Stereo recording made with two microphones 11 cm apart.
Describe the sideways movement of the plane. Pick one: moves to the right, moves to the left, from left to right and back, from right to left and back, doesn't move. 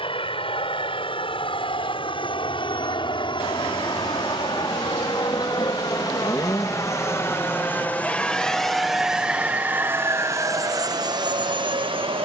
moves to the right.